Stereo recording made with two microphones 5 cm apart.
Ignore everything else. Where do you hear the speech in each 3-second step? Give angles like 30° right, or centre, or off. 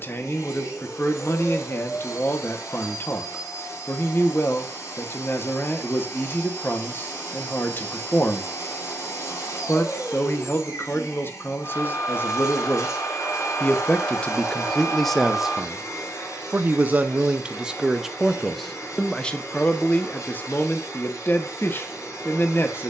50° left, 50° left, 50° left, 50° left, 30° left, 20° right, 20° left, 40° left.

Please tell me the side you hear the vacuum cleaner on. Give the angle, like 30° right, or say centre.
80° left.